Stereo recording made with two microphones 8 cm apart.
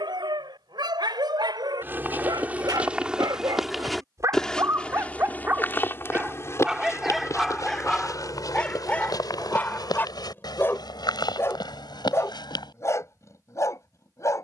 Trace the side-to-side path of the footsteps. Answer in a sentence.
In this clip you hear the footsteps move to the left.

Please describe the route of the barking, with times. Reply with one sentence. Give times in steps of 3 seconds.
In this clip you hear the barking on the right from 0 s, in the centre from 6 s and on the left from 9 s.